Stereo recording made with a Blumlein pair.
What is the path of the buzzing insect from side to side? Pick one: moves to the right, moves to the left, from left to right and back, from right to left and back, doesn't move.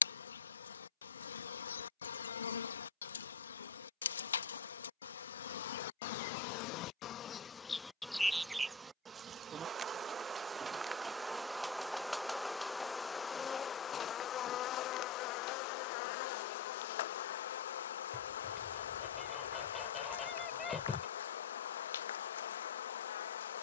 from left to right and back.